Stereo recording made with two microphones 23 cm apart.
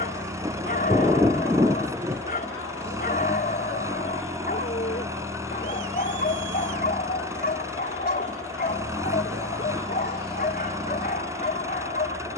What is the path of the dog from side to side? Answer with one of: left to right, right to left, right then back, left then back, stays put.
stays put.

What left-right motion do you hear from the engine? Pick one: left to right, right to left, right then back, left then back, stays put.
stays put.